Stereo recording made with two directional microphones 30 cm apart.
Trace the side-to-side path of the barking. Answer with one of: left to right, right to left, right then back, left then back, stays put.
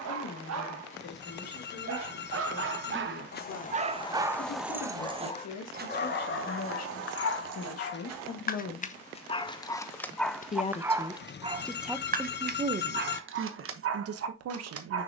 left then back.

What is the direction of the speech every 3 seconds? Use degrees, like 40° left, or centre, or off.
70° left, 60° left, 50° left, 10° left, 40° right.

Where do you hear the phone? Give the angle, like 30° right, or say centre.
40° left.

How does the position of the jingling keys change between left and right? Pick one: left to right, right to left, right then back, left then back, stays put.
left to right.